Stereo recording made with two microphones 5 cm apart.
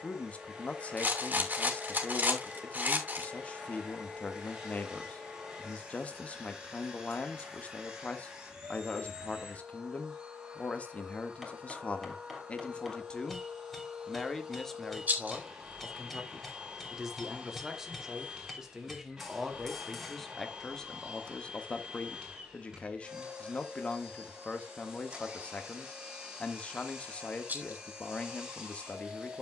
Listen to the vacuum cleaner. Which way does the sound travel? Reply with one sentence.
In this clip you hear the vacuum cleaner stay in one place.